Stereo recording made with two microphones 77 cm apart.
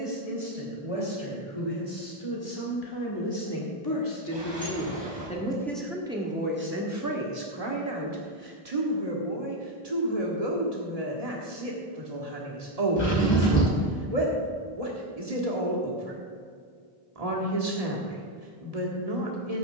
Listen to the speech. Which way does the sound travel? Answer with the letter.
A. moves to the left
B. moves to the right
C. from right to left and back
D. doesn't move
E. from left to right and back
B.